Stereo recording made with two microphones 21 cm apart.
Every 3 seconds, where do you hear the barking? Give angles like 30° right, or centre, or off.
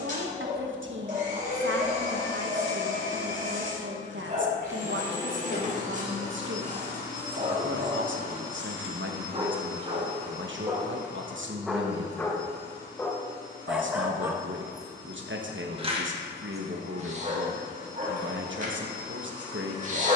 40° right, 40° right, 40° right, 20° right, centre, 30° right, 40° right.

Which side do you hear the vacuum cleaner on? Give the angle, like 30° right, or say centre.
70° left.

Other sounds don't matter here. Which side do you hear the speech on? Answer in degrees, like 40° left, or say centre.
80° right.